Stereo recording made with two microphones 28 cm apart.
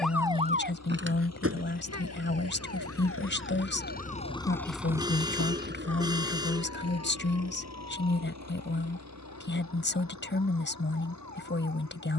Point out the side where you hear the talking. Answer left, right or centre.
left.